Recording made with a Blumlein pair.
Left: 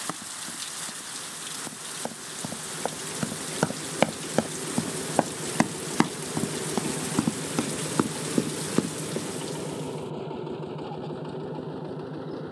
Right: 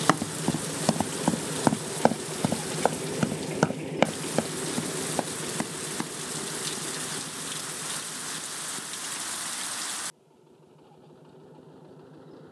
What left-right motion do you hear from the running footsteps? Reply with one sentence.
You can hear the running footsteps go from the right side to the left.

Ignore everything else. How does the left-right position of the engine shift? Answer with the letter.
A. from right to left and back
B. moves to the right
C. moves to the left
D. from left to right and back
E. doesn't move
C.